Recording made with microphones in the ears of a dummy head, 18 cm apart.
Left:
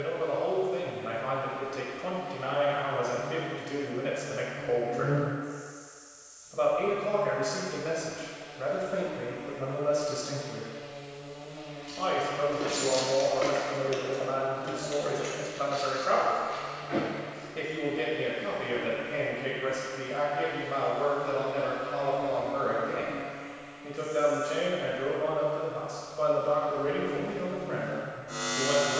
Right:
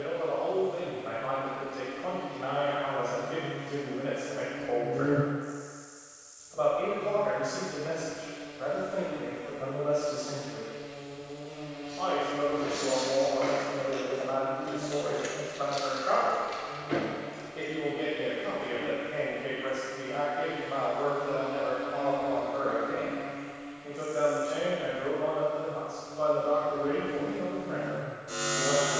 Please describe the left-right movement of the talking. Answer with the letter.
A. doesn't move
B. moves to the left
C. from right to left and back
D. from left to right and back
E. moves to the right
A.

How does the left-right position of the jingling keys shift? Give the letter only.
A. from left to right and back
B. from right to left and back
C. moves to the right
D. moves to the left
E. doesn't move
C.